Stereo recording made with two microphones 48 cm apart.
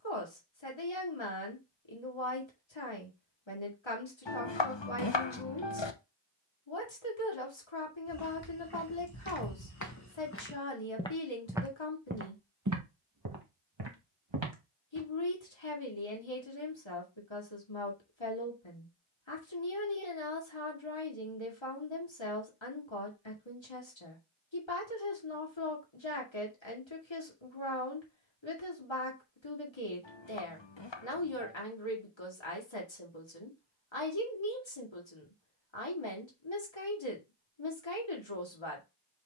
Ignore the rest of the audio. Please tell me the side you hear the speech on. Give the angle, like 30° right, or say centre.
70° left.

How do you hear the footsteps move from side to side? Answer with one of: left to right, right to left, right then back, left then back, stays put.
left to right.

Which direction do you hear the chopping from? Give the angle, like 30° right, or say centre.
60° left.